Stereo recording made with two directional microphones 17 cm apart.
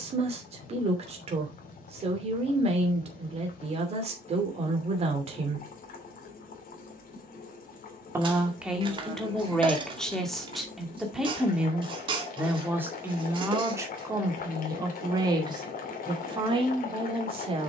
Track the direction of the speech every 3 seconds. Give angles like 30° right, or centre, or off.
40° right, 40° right, 10° right, centre, 20° right, 30° right.